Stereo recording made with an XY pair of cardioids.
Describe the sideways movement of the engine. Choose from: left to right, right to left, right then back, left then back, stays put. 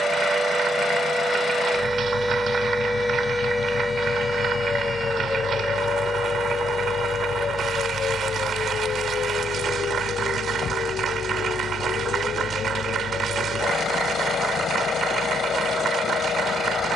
stays put.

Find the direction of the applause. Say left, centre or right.
right.